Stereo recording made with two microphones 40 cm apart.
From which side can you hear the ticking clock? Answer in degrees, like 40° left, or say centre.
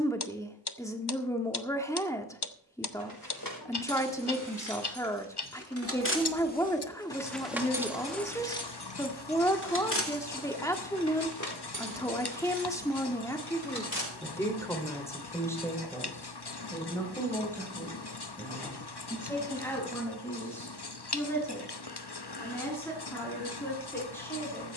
70° left.